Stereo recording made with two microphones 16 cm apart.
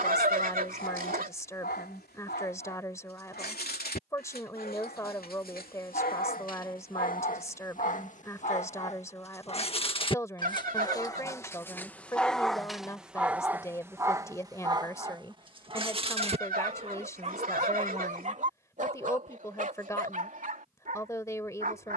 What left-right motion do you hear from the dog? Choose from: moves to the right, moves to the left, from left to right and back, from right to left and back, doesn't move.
moves to the right.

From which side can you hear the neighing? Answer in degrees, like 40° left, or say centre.
60° right.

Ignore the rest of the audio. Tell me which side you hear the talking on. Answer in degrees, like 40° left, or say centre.
20° left.